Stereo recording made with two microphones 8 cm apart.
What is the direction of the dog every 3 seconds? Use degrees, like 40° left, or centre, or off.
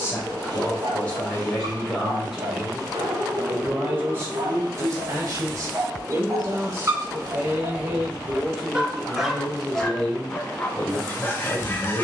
70° right, 60° right, 30° right, 20° left.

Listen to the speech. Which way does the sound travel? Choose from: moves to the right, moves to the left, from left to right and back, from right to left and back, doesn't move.
from left to right and back.